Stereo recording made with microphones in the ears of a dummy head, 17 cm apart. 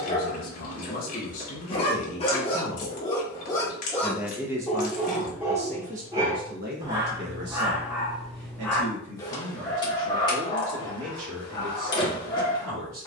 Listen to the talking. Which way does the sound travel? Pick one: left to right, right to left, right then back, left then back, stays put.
left to right.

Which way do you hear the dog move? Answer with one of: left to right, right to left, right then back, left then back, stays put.
right then back.